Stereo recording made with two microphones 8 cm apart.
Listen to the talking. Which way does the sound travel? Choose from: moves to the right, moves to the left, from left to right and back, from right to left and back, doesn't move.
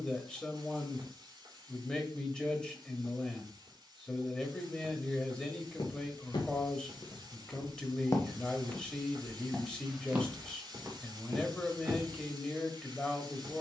doesn't move.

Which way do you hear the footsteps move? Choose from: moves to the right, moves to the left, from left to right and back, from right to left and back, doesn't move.
moves to the right.